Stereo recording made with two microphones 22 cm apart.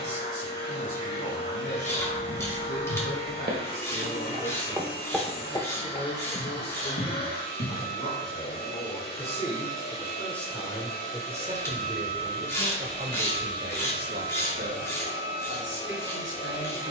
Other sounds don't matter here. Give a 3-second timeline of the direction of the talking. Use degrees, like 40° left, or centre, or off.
60° left, 60° left, 50° left, centre, 40° right, 60° right.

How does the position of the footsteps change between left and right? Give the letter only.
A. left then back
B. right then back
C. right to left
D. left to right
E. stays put
C.